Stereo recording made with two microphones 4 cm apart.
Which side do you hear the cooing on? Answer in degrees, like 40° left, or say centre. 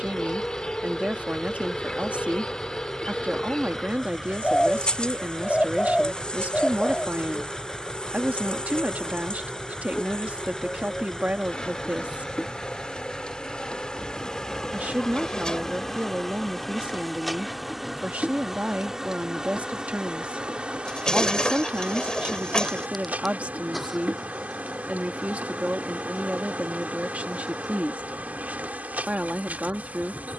20° left.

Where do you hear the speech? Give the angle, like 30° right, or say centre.
30° right.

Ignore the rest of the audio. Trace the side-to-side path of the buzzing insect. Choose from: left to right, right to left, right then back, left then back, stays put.
left to right.